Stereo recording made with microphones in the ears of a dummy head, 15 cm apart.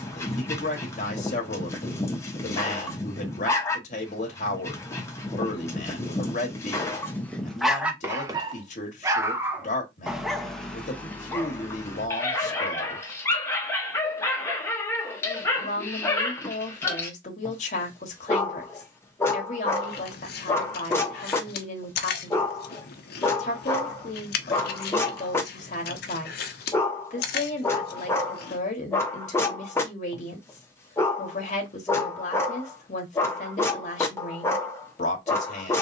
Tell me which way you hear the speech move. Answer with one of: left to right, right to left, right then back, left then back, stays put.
stays put.